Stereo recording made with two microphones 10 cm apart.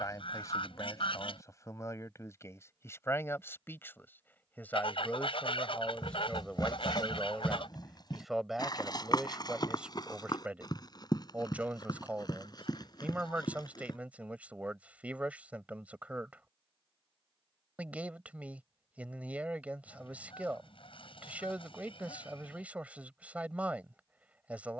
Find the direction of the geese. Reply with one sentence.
You can hear the geese on the left.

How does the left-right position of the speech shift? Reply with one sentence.
In this clip you hear the speech travel towards the right.